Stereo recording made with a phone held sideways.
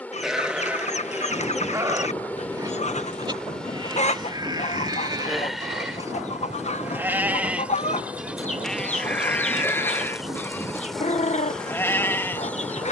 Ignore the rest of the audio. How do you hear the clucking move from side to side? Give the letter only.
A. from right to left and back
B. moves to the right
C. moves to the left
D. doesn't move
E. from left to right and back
D.